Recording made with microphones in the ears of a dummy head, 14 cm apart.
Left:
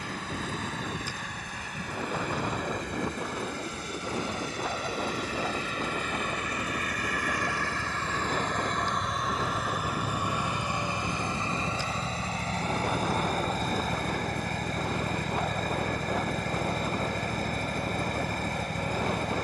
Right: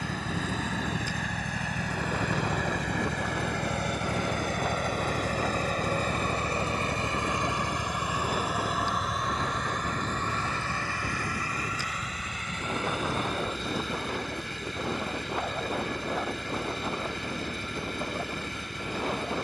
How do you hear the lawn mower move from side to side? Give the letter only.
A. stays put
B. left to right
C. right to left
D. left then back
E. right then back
C.